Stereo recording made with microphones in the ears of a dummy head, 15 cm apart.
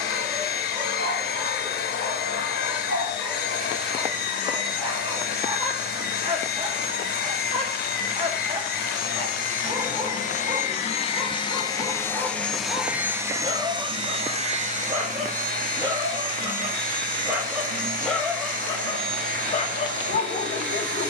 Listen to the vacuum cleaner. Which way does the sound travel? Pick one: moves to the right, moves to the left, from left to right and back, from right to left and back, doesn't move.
moves to the right.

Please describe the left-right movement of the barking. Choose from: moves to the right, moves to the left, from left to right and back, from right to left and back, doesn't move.
moves to the left.